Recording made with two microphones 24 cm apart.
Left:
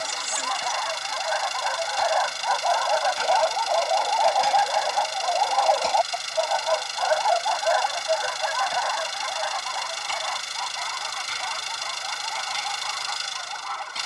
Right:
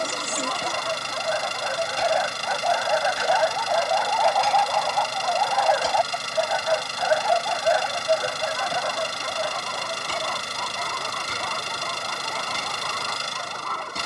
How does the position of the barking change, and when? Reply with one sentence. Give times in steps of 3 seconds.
In this clip you hear the barking on the right from 0 s, in the centre from 3 s and on the right from 6 s.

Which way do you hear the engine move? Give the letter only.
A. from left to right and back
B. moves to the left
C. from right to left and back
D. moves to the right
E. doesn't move
E.